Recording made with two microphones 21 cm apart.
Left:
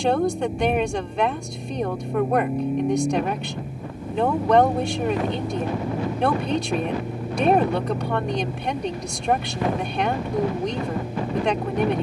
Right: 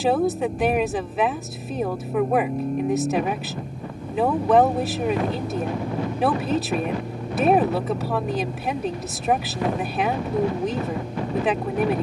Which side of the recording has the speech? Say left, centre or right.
centre.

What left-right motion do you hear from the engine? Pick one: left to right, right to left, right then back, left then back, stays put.
stays put.